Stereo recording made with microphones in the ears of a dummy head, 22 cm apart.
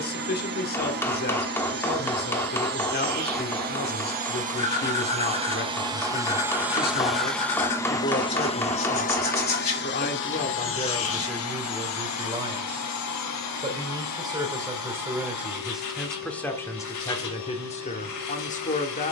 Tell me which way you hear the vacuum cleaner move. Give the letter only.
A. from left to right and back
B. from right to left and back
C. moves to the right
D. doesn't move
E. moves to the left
E.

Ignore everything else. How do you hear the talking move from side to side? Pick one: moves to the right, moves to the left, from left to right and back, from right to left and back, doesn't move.
from left to right and back.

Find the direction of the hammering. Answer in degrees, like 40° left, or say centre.
10° left.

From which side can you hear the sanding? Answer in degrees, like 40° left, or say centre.
30° left.